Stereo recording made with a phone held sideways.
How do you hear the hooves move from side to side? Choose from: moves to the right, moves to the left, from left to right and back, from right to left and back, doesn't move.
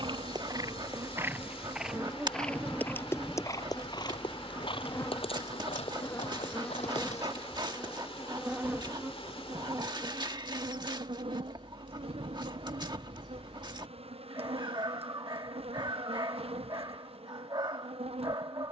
moves to the left.